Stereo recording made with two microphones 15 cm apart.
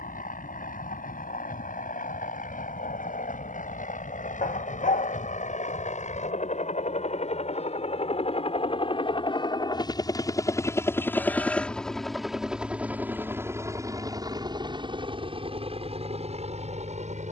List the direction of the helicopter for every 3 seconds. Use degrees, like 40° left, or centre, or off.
70° left, 60° left, 50° left, 20° left, 20° right, 40° right.